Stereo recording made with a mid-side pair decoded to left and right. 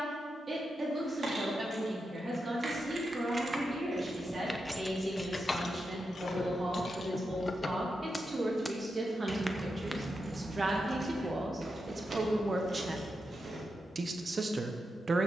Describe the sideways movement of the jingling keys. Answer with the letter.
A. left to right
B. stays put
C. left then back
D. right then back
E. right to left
C.